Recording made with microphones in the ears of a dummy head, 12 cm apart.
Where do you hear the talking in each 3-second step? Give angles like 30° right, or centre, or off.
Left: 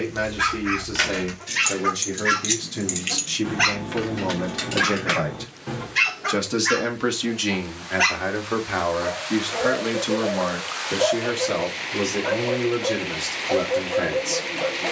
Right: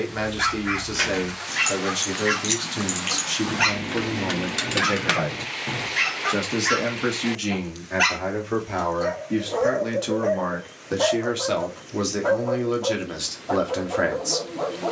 30° right, 10° right, 40° left, 10° left, 20° right.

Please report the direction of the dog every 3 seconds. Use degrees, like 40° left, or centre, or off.
20° left, 10° left, centre, 20° right, 50° right.